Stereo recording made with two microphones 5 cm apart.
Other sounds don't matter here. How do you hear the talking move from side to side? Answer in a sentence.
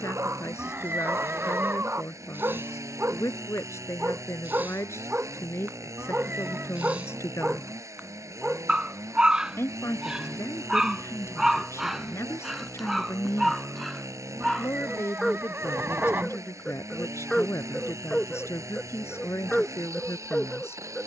In this clip you hear the talking stay put.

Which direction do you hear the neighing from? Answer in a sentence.
You can hear the neighing on the right.